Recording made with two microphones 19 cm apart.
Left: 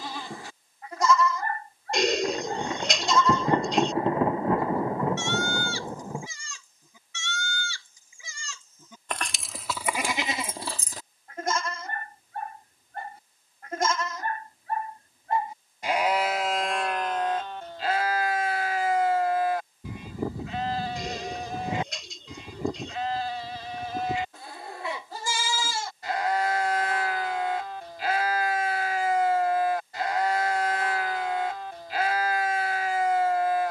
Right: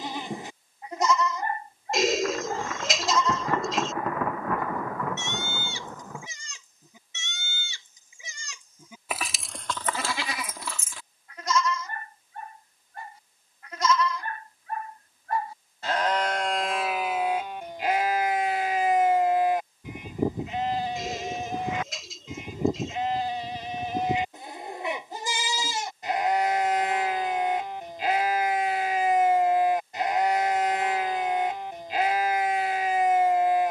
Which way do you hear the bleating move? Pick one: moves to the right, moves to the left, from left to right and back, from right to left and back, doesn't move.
from right to left and back.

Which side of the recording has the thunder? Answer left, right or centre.
left.